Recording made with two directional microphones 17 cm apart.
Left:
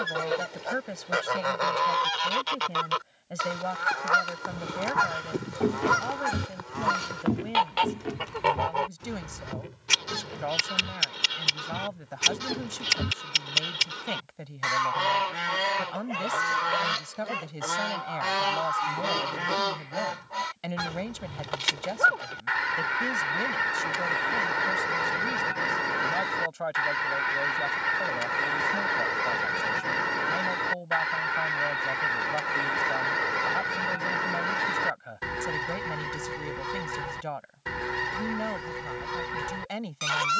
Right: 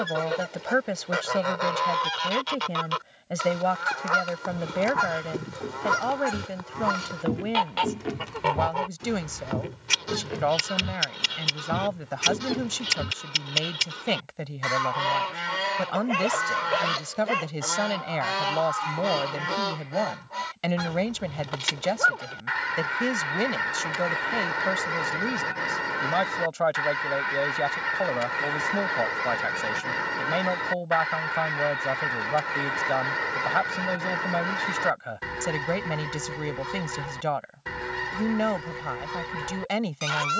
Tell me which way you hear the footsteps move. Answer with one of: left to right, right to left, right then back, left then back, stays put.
right then back.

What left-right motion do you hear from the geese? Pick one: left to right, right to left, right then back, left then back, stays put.
stays put.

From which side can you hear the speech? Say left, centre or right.
right.